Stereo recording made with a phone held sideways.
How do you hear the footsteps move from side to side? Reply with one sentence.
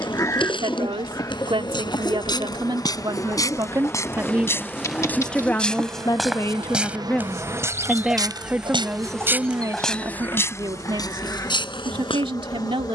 You can hear the footsteps go right and come back.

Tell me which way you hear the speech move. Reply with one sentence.
You can hear the speech move from right to left and back again.